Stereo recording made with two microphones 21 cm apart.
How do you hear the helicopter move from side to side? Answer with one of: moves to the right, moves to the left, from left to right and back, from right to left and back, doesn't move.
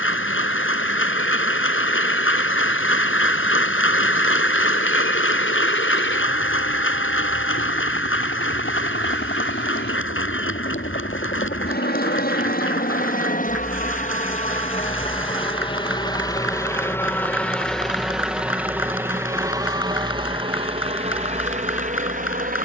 moves to the right.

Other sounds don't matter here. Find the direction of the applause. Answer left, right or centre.
left.